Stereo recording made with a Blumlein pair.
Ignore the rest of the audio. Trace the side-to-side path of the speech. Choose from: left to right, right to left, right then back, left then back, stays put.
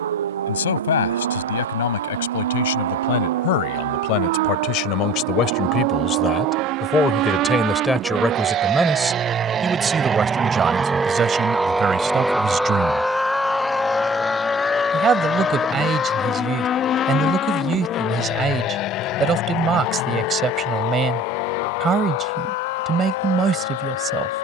left to right.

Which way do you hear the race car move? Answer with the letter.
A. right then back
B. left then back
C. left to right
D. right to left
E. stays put
D.